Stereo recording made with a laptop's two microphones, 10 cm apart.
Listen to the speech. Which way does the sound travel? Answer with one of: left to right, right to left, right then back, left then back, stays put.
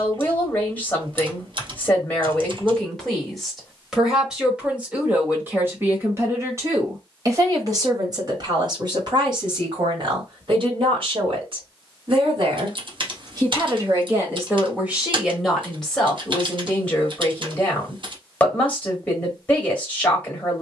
right then back.